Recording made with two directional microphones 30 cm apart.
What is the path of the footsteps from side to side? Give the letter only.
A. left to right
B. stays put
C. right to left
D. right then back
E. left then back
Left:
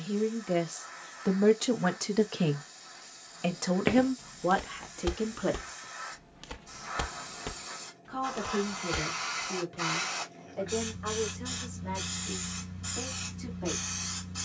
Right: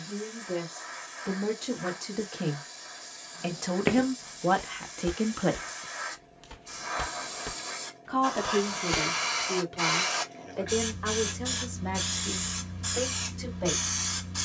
E.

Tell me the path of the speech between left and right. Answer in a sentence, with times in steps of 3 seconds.
You can hear the speech on the left from 0 s, in the centre from 3 s and on the right from 6 s.